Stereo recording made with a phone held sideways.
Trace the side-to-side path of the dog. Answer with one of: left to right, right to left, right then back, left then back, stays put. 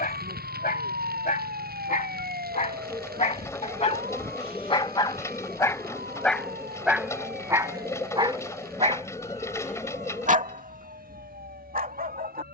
left to right.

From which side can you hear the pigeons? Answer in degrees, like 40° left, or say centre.
20° left.